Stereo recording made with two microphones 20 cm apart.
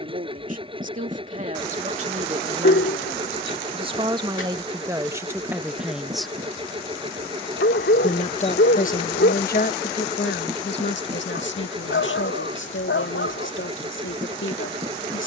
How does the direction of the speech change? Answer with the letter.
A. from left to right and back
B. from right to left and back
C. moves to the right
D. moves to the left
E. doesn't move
D.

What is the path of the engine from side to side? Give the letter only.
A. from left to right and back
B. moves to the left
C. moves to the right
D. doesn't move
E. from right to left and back
D.